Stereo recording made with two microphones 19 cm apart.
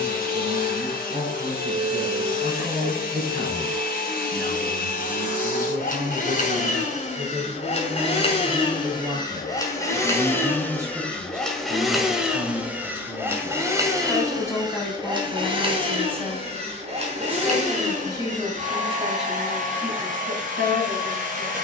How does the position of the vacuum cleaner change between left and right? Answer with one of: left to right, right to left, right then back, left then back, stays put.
left to right.